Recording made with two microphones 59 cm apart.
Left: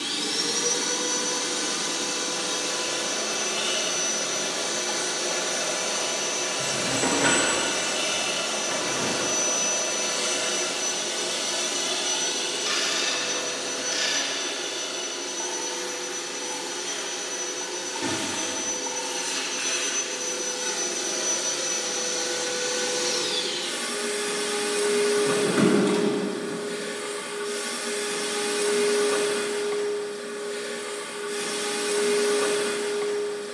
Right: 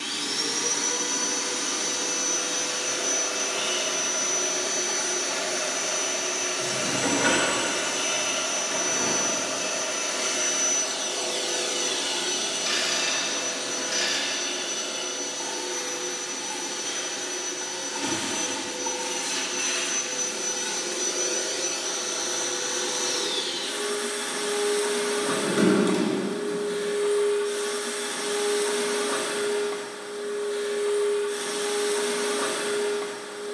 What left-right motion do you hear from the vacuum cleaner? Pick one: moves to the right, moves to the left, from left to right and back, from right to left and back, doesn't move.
from left to right and back.